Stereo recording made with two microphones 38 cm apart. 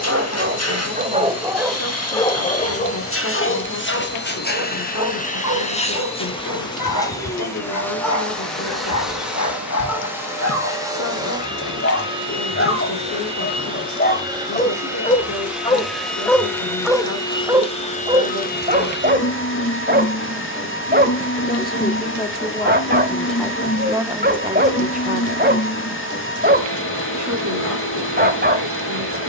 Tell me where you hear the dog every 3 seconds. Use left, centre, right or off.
centre, left, left, left, left, centre, right, right, right, right.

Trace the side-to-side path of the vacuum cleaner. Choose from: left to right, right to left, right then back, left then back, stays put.
right then back.